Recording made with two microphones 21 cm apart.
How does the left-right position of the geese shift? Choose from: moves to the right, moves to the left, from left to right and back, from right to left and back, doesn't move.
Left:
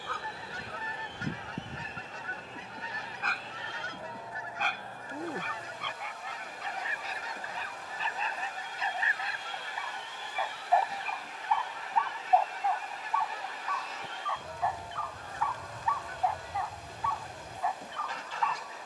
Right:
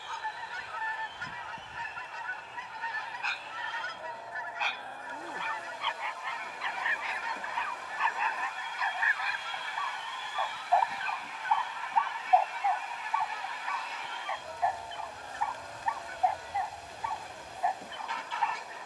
doesn't move.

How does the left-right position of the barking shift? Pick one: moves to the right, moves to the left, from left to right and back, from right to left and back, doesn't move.
moves to the right.